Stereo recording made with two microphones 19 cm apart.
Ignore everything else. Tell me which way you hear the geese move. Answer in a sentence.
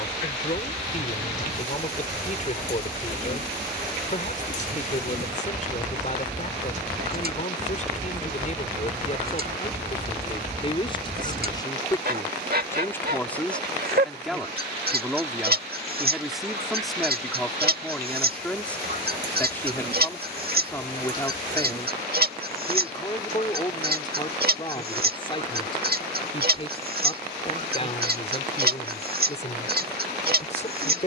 In this clip you hear the geese stay put.